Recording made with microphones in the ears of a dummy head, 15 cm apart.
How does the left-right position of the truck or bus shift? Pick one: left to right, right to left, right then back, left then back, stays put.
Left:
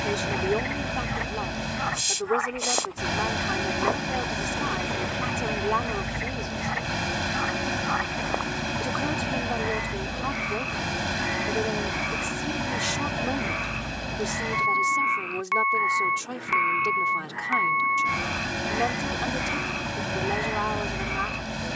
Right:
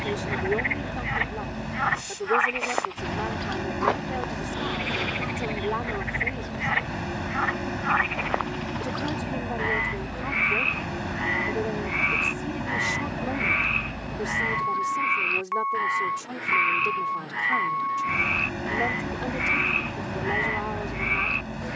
stays put.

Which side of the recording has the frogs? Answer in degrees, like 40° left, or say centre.
50° right.